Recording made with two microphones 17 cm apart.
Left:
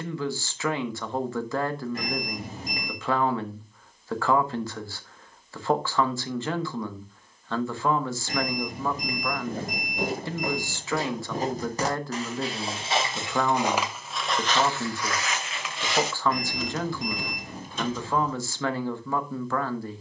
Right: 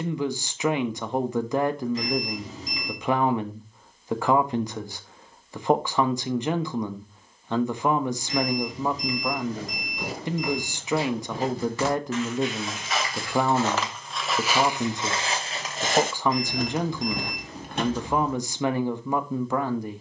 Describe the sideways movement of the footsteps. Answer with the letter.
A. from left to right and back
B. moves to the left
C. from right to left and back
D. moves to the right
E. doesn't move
D.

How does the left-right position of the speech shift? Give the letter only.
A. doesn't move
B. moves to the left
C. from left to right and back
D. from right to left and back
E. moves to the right
A.